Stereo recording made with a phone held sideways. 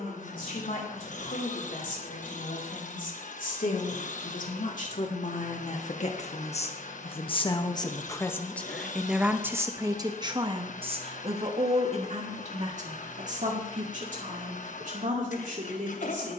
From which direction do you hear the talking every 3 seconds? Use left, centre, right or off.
left, left, left, right, right, right.